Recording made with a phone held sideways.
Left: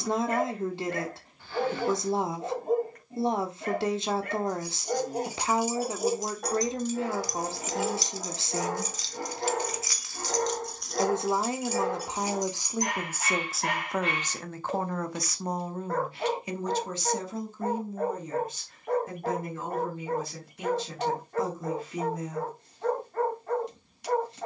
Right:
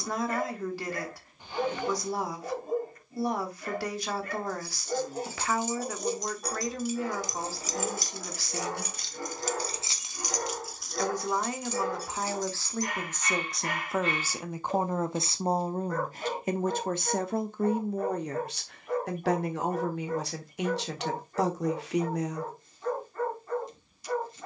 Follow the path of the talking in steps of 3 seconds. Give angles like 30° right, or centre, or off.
20° left, 20° left, 20° left, 20° left, centre, 50° right, 70° right, 70° right.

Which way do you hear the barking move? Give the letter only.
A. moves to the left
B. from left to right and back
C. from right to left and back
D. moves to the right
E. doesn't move
E.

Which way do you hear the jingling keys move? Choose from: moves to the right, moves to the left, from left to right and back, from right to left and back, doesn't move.
from left to right and back.